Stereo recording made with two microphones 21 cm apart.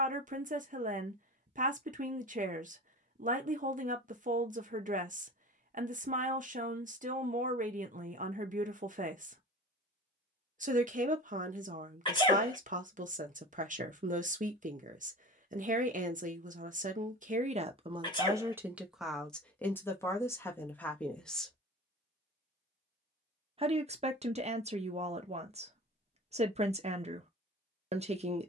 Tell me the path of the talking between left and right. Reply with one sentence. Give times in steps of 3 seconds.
In this clip you hear the talking on the right from 0 s, in the centre from 18 s and on the right from 24 s.